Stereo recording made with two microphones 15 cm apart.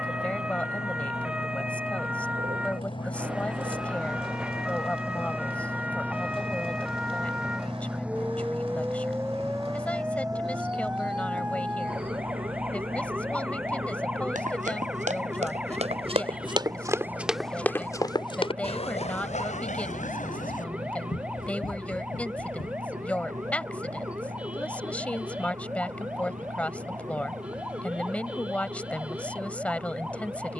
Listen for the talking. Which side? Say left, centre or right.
centre.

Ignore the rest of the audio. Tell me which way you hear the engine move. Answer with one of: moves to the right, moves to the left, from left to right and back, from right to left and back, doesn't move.
moves to the right.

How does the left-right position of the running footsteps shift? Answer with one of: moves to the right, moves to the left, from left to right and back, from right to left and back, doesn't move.
moves to the left.